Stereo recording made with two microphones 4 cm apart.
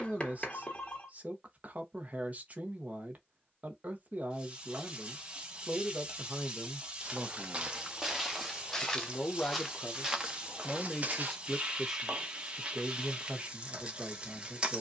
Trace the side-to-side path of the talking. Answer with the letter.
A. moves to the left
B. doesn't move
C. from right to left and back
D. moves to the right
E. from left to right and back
C.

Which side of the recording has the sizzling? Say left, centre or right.
right.